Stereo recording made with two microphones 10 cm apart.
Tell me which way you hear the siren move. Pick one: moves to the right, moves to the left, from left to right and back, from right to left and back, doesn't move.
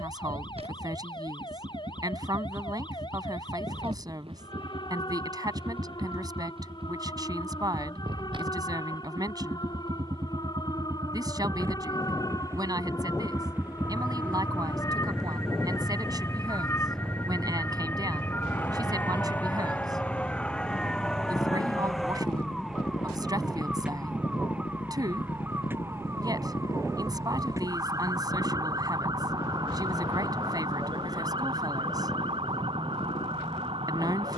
moves to the right.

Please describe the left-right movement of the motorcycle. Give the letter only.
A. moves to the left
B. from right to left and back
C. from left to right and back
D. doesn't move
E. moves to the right
A.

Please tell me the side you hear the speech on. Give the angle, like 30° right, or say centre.
40° right.